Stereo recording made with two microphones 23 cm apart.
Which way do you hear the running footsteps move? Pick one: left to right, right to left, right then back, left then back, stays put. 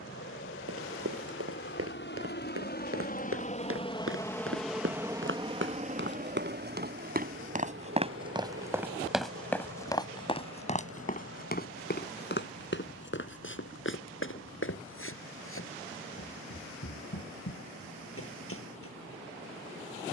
right to left.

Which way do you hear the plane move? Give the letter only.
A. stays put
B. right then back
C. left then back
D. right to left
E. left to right
E.